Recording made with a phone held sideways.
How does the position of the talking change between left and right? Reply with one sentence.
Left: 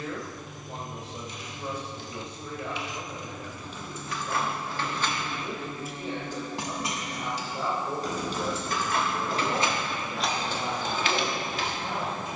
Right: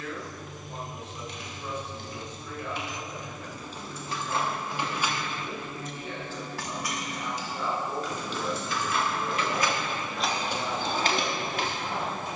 In this clip you hear the talking stay put.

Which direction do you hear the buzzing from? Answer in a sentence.
You can hear the buzzing in the centre.